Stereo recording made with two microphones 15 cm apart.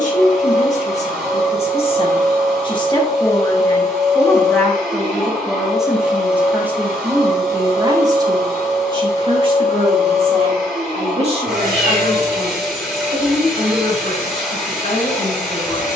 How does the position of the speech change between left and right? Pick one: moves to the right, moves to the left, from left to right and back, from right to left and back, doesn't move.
moves to the right.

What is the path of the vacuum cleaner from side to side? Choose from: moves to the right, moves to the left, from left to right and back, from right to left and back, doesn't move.
doesn't move.